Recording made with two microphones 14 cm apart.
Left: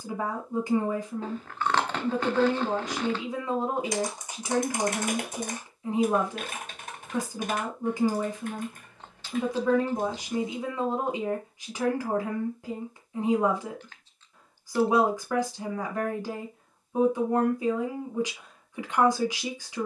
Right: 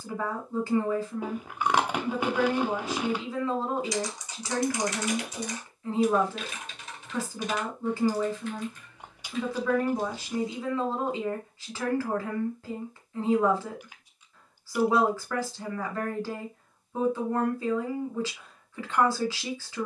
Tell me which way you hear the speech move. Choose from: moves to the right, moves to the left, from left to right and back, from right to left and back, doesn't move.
doesn't move.